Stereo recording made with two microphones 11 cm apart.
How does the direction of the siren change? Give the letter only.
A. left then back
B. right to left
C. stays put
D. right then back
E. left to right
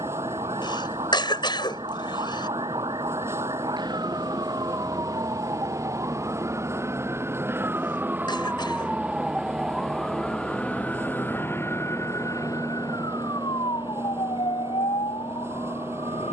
B.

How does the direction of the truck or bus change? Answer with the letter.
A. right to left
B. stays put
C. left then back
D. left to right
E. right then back
B.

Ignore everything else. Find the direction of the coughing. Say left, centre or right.
left.